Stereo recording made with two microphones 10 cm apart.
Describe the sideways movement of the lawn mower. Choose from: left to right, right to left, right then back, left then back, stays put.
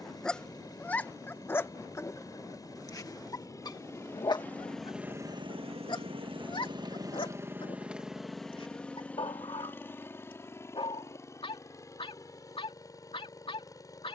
right then back.